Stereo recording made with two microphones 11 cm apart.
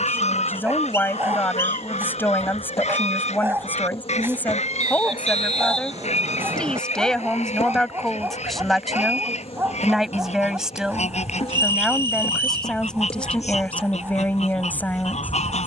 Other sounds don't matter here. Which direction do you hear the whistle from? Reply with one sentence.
You can hear the whistle on the right.